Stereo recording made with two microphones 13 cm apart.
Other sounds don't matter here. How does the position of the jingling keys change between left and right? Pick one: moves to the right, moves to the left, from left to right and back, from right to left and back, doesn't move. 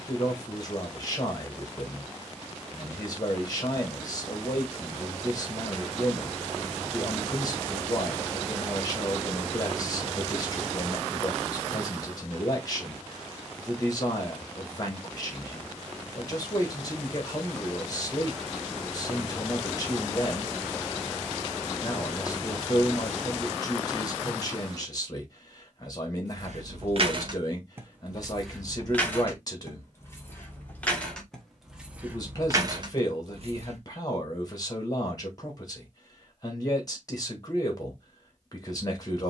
from right to left and back.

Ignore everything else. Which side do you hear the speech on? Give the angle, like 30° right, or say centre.
30° left.